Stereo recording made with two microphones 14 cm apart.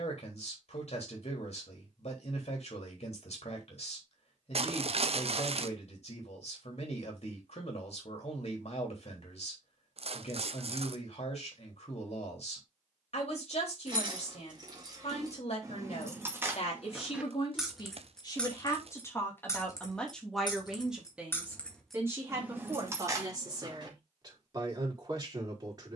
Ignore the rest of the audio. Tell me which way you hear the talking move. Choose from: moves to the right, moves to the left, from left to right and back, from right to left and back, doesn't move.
moves to the right.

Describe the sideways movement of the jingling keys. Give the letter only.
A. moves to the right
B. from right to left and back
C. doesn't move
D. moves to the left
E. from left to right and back
B.